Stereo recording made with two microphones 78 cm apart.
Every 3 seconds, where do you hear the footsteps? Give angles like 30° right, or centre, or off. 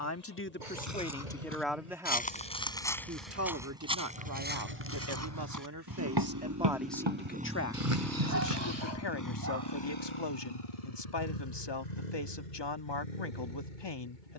10° left, 10° right, 40° right, off, off.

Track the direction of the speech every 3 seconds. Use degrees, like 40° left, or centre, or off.
10° left, 20° right, 10° left, 30° left, 30° left.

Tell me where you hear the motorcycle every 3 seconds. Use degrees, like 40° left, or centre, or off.
50° right, 40° right, 10° right, 40° left, 70° left.